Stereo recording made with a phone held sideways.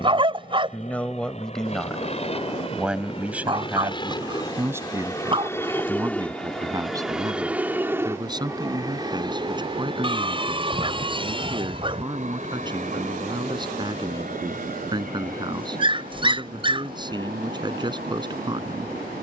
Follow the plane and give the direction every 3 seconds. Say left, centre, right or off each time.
left, left, centre, right, right, right, right.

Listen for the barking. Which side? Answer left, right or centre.
right.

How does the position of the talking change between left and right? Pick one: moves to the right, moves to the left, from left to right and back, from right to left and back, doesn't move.
moves to the right.